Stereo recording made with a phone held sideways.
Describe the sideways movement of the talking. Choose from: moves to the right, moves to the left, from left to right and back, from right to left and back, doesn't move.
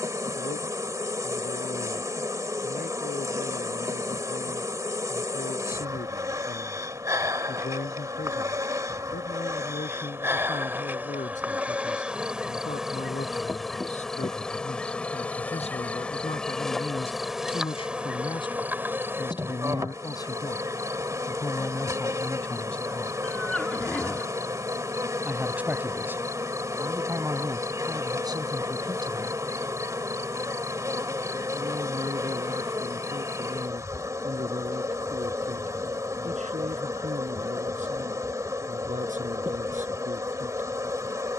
moves to the right.